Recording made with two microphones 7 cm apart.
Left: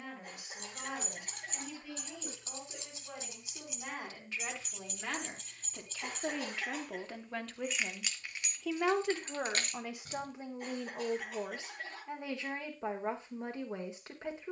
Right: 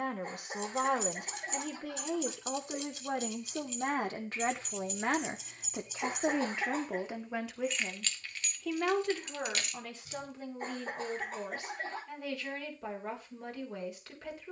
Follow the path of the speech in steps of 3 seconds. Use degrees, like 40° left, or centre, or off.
70° right, 50° right, 10° right, 20° left, 30° left.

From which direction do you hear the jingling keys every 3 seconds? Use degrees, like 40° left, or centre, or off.
50° left, 10° left, 10° left, 50° left, off.